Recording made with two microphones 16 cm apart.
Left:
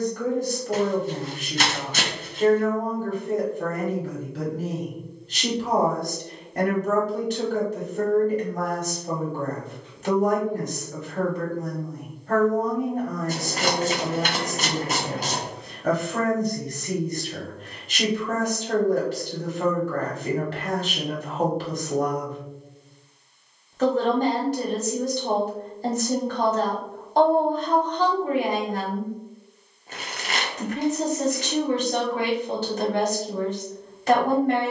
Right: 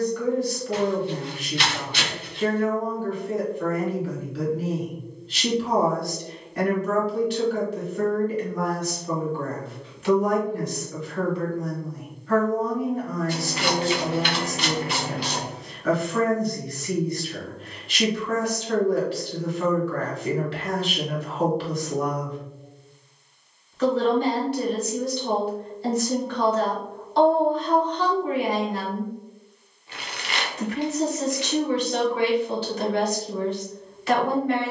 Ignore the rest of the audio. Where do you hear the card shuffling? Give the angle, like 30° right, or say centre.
40° left.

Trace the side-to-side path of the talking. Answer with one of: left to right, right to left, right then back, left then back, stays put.
stays put.